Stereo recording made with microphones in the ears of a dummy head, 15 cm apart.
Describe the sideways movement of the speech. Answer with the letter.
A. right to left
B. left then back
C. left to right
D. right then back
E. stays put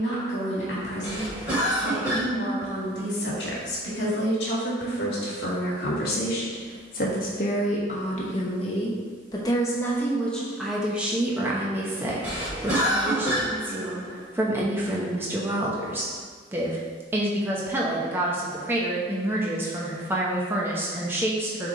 C.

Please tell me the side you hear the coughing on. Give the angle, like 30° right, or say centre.
10° right.